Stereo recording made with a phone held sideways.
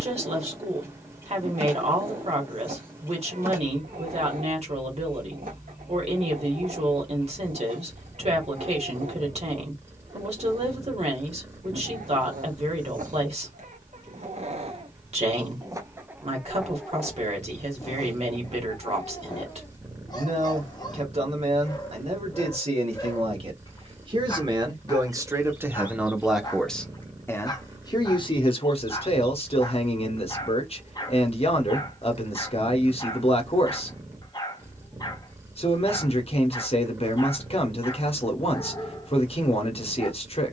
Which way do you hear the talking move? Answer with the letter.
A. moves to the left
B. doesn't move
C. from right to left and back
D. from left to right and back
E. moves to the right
A.